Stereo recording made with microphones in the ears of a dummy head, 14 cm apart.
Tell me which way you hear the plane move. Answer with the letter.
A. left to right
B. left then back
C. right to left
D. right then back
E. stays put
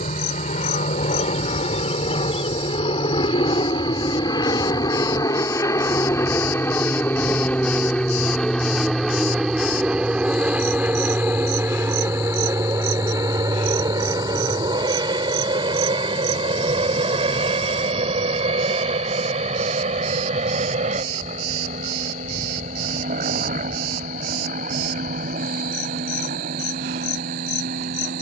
A.